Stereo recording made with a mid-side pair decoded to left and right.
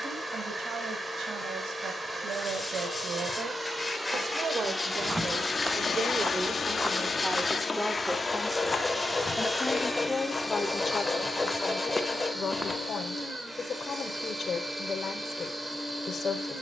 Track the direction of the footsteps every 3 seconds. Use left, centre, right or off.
off, centre, centre, left, centre, off.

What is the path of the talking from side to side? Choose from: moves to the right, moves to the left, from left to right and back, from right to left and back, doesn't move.
moves to the left.